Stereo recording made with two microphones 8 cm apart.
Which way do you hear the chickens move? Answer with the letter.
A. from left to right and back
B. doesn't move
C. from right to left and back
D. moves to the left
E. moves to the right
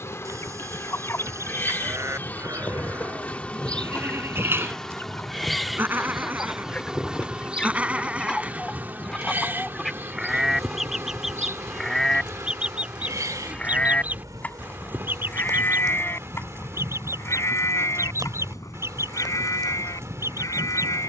E.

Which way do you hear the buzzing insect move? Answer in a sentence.
You can hear the buzzing insect go from the left side to the right.